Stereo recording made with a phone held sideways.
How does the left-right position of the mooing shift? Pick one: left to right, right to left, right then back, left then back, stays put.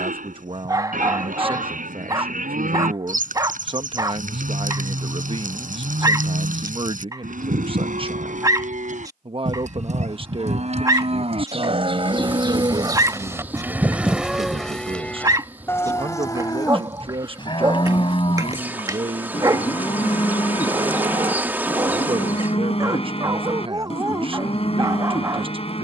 right to left.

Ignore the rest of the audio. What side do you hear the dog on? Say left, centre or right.
right.